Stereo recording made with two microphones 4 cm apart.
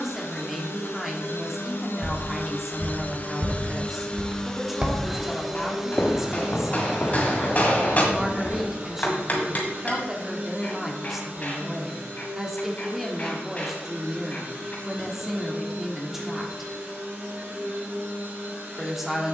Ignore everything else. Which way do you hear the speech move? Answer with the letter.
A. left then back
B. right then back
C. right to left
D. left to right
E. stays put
E.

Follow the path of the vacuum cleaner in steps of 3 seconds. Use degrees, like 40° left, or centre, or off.
60° left, 20° left, 20° right, 40° right, 50° right, 50° right, 60° right.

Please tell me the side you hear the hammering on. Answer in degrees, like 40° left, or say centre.
40° left.